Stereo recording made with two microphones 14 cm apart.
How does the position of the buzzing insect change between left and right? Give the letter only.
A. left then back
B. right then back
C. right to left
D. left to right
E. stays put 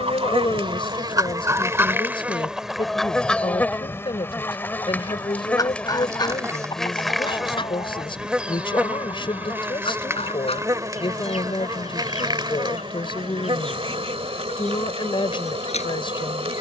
A.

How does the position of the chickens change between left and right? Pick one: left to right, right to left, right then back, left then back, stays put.
right to left.